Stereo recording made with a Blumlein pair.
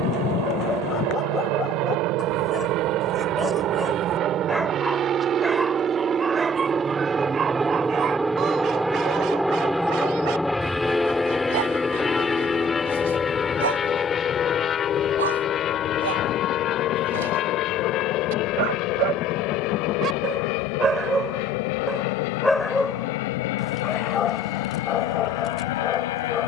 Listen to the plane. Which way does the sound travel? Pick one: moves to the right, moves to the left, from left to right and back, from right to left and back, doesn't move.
moves to the left.